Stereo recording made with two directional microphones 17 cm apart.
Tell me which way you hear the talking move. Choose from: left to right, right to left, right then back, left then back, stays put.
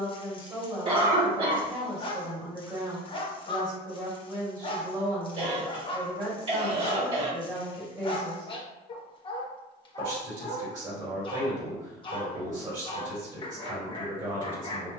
stays put.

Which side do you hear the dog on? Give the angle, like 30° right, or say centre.
30° left.